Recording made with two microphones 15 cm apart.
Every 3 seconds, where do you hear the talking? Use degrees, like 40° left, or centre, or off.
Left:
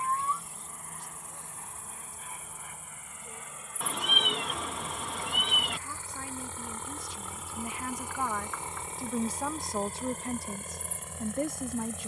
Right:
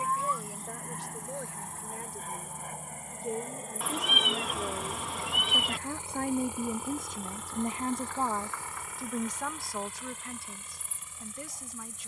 80° right, 70° right, 40° right, 30° left.